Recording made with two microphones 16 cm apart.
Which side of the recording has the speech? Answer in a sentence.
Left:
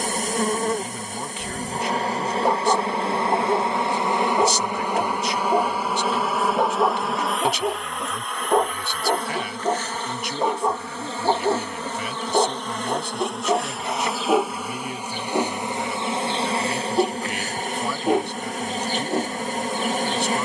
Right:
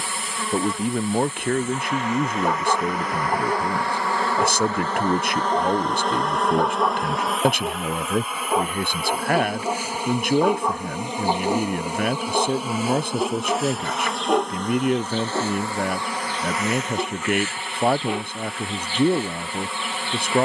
In this clip you hear the speech on the right.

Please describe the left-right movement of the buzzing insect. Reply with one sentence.
In this clip you hear the buzzing insect move from left to right and back again.